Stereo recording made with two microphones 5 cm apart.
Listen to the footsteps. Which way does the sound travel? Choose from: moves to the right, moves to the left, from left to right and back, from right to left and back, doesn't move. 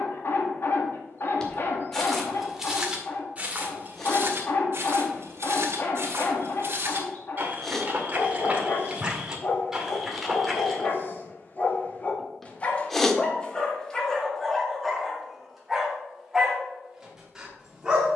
from left to right and back.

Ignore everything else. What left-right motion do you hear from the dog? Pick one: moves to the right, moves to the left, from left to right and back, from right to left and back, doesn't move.
moves to the right.